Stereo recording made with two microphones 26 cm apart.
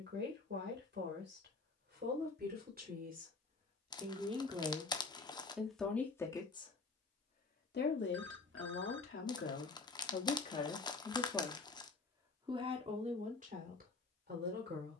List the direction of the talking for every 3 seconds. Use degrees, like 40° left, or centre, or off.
40° right, 20° right, 30° left, 30° left, 30° right.